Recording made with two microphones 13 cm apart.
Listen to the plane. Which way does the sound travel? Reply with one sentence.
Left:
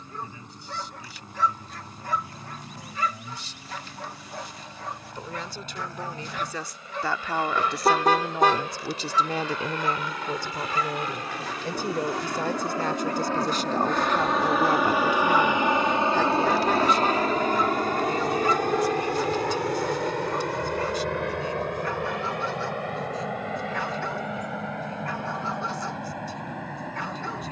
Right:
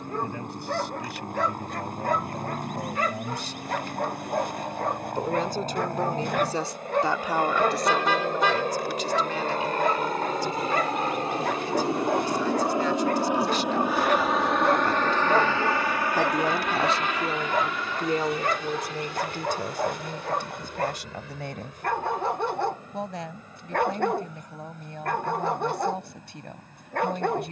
In this clip you hear the plane go from the right side to the left.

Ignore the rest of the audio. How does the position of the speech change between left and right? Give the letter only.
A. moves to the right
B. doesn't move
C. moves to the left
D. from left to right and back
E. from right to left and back
E.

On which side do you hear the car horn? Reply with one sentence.
In this clip you hear the car horn on the left.